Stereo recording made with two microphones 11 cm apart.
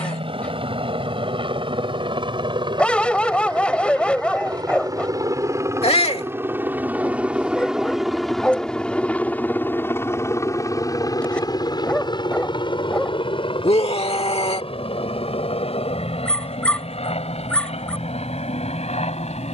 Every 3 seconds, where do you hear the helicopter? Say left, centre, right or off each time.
right, right, centre, left, left, left, left.